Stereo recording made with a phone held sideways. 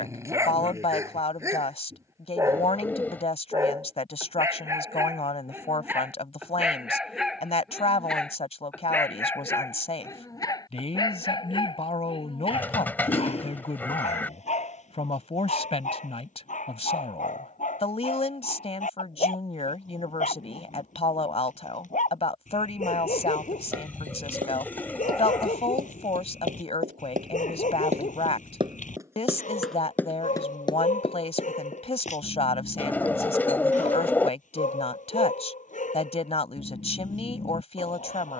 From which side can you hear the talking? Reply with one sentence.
In this clip you hear the talking on the left.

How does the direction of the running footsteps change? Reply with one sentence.
In this clip you hear the running footsteps move to the left.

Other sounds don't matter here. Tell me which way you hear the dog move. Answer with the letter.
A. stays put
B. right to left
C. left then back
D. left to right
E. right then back
B.